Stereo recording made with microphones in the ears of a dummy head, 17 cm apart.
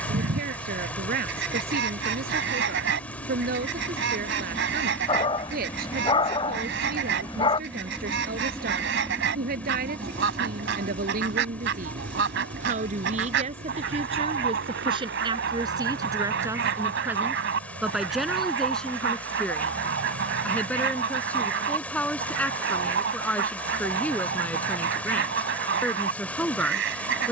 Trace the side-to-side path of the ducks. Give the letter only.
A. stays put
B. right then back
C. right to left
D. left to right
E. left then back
A.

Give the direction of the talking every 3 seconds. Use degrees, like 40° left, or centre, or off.
50° right, 50° right, 50° right, 50° right, 30° right, 20° right, centre, 10° left, 10° left.